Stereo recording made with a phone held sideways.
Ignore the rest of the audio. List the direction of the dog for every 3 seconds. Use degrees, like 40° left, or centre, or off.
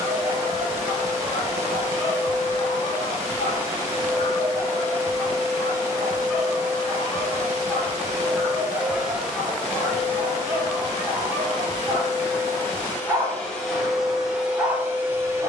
centre, 20° left, 10° left, 10° right, 20° right.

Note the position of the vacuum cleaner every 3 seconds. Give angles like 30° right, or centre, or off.
20° right, 20° right, 20° right, 20° left, 10° left.